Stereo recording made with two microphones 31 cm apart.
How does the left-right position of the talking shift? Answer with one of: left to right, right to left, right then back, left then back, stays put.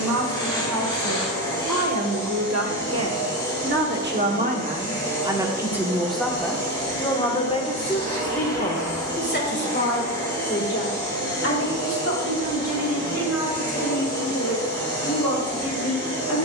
right to left.